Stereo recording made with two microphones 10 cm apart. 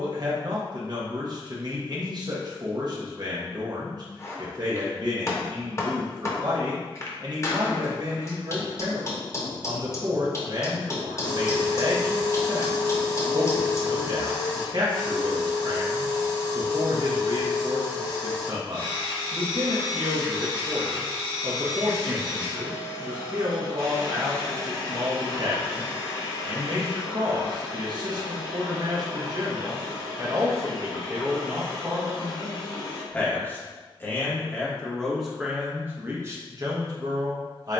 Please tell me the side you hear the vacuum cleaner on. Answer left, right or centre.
left.